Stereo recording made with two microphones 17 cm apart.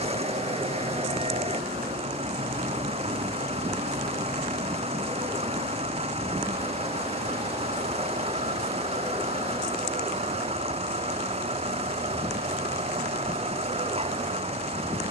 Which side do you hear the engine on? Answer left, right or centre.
right.